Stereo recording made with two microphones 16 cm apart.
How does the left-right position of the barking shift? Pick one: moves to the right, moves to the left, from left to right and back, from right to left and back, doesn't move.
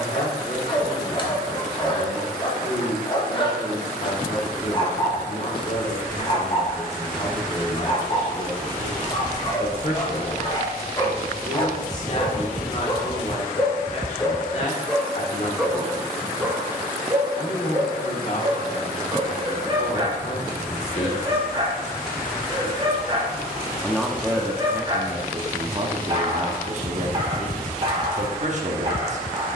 moves to the right.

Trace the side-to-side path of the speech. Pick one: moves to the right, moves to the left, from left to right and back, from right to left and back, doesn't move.
moves to the right.